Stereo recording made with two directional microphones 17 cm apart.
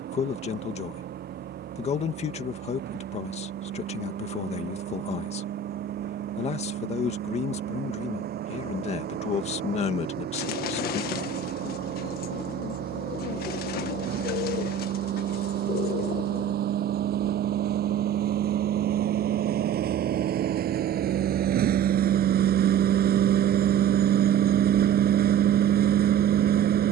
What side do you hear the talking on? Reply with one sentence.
You can hear the talking on the left.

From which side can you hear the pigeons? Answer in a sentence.
You can hear the pigeons on the left.